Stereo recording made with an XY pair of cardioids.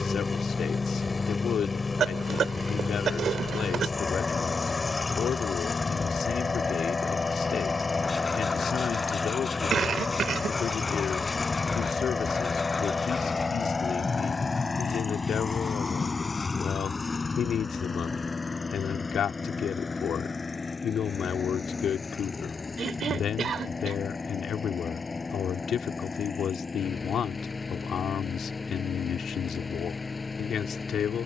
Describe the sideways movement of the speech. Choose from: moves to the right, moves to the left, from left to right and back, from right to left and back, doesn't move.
doesn't move.